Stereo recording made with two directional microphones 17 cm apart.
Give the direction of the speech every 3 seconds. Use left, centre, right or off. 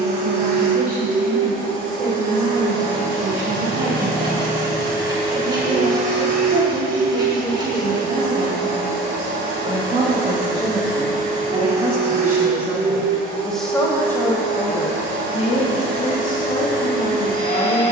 right, right, right, right, centre, left.